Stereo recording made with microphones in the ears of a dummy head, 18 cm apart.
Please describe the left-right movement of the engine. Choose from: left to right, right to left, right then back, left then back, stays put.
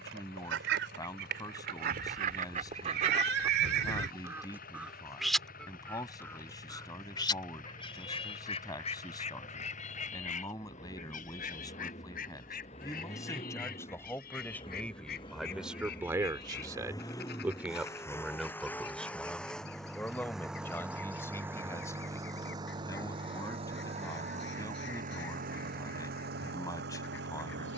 left to right.